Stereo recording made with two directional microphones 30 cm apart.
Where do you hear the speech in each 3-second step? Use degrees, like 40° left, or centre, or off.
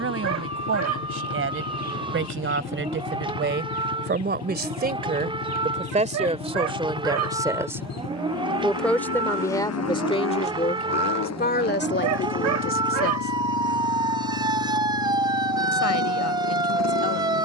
50° right, 30° right, 10° right, 20° left, 40° left, 60° left.